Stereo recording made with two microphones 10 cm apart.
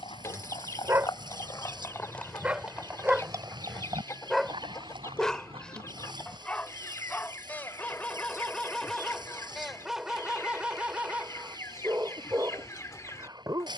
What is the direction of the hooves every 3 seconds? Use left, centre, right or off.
left, right, right, off, off.